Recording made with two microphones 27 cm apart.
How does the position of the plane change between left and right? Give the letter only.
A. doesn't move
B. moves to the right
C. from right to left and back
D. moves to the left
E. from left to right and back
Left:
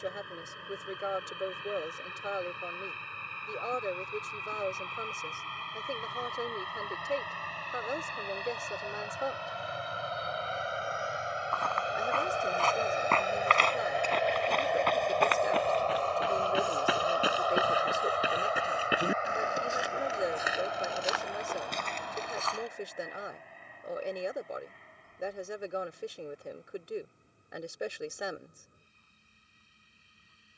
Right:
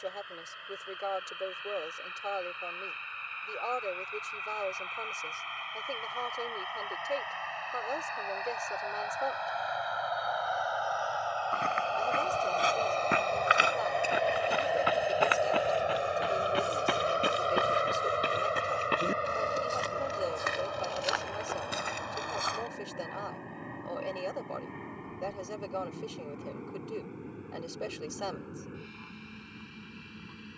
B.